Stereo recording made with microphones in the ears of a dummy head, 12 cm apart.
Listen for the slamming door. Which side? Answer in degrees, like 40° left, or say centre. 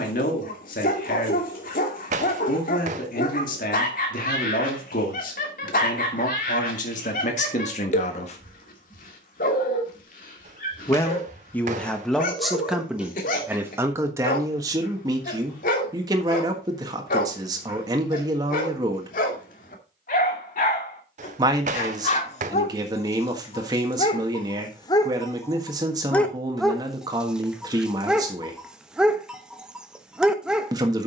60° right.